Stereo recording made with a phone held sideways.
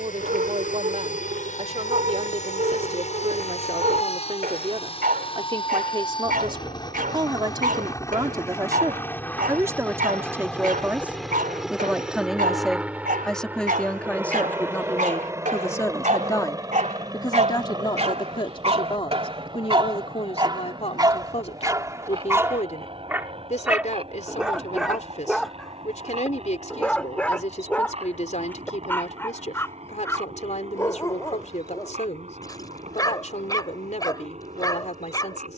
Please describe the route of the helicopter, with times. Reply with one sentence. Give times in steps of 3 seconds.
You can hear the helicopter on the left from 0 s, in the centre from 9 s and on the right from 15 s.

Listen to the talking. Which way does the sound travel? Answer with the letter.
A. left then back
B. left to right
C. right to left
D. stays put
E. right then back
C.